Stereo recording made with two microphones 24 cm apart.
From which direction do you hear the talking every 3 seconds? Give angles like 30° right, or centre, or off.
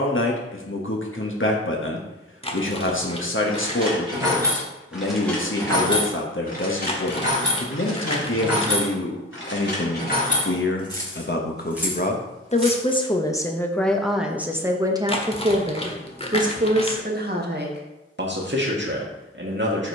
50° left, 50° left, 50° left, 50° left, 10° left, 30° right, 50° right.